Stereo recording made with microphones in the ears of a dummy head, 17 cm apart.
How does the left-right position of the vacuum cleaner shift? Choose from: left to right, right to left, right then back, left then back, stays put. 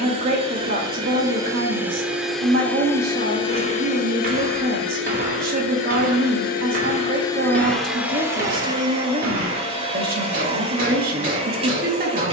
left then back.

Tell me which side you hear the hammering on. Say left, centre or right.
right.